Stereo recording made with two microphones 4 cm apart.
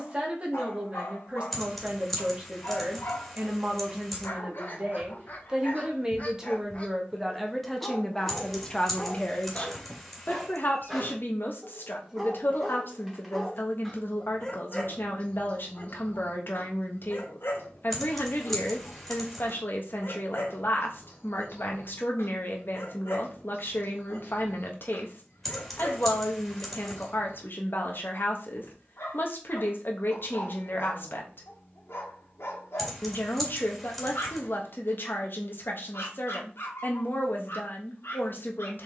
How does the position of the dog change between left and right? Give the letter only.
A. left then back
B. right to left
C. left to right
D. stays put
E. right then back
E.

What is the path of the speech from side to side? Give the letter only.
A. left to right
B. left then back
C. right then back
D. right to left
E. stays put
D.